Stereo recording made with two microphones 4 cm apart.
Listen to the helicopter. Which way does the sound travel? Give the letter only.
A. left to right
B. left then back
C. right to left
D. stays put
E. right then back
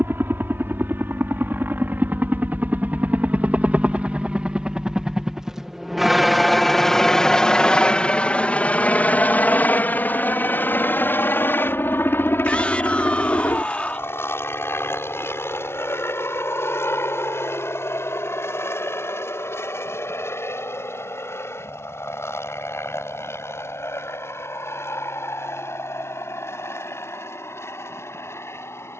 C.